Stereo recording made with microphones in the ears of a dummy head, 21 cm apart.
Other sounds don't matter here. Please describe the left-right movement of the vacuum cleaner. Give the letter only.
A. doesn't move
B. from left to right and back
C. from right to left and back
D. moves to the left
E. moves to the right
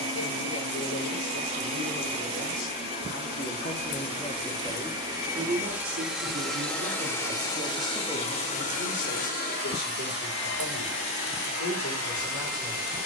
D.